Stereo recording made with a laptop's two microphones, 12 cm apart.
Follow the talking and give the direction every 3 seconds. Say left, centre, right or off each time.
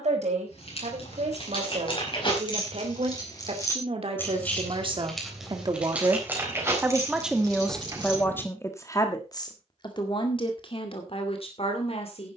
right, right, centre, left.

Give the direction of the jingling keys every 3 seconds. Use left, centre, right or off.
left, centre, right, off.